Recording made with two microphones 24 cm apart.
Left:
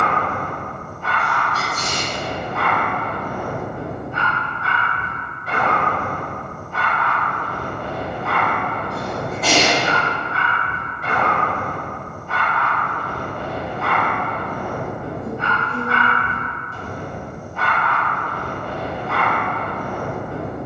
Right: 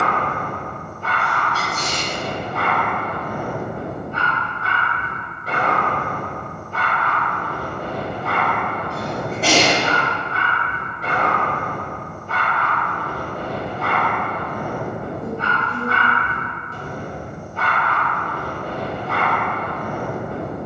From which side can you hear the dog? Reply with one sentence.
In this clip you hear the dog on the right.